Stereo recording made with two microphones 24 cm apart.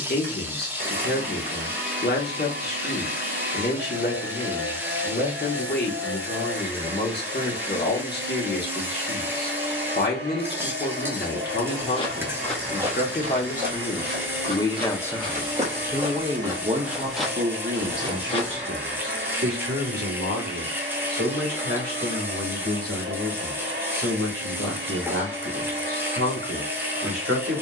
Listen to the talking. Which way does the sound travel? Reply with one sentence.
In this clip you hear the talking travel towards the right.